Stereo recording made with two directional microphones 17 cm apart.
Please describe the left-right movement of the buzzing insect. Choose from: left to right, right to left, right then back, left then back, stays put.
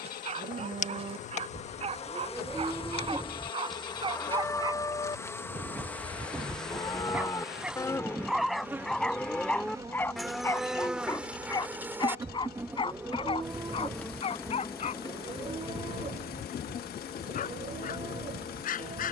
right then back.